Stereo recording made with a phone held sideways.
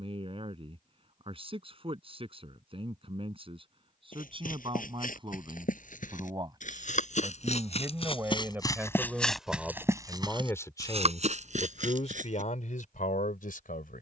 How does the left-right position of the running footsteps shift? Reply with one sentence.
In this clip you hear the running footsteps go from the left side to the right.